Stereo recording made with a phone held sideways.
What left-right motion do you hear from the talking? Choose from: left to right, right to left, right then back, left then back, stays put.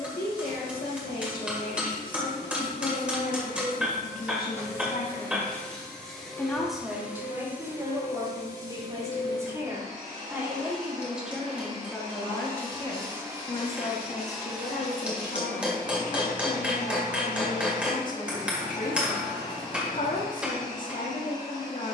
right then back.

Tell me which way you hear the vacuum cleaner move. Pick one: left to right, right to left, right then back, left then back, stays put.
right then back.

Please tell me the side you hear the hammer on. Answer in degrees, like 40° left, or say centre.
10° right.